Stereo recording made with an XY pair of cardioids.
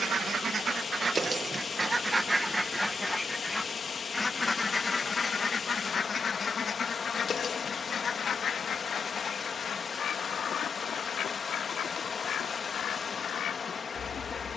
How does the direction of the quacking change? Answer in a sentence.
In this clip you hear the quacking move to the left.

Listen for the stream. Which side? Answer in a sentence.
In this clip you hear the stream on the left.